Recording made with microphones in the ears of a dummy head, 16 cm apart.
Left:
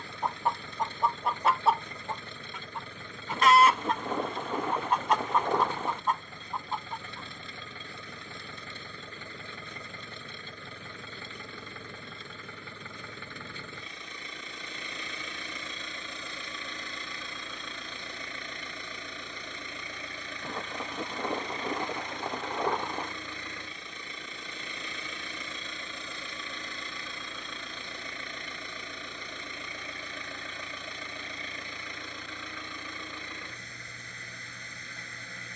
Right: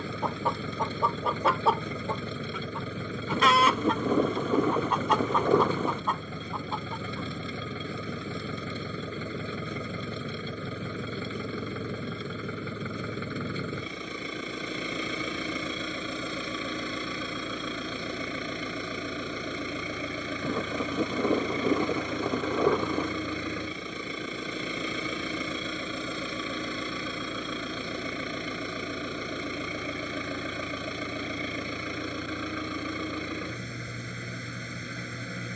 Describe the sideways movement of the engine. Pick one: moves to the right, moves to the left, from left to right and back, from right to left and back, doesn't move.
doesn't move.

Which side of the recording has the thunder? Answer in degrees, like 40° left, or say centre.
80° right.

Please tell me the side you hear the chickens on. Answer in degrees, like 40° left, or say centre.
70° right.